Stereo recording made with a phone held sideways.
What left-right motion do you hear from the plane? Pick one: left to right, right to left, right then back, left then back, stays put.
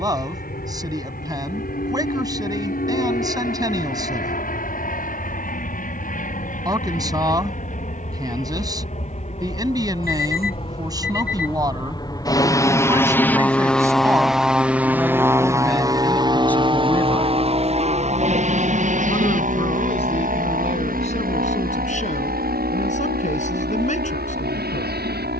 left to right.